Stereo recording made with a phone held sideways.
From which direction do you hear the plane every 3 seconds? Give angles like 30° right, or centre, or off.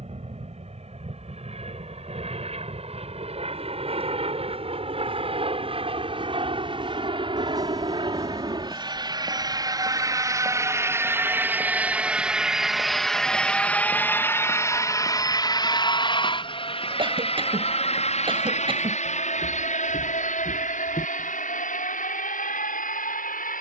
60° right, 50° right, 40° right, 20° right, 10° left, 40° left, 60° left, 70° left.